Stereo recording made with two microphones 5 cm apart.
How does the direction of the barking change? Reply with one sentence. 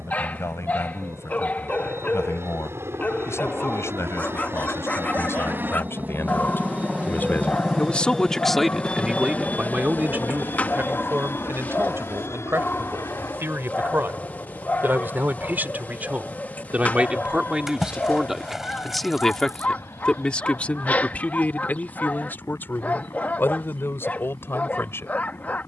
In this clip you hear the barking stay in one place.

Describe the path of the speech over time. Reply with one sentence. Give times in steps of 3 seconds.
You can hear the speech on the left from 0 s, on the right from 9 s, in the centre from 18 s and on the left from 21 s.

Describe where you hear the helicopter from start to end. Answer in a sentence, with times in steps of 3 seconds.
In this clip you hear the helicopter on the right from 0 s, in the centre from 6 s and on the left from 9 s.